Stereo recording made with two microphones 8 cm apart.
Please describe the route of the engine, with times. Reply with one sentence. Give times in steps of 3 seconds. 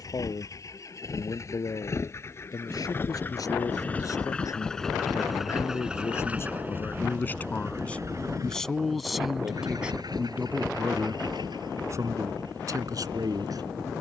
In this clip you hear the engine on the left from 0 s, in the centre from 3 s and on the right from 6 s.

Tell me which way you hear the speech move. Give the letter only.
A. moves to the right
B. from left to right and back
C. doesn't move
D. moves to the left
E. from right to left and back
A.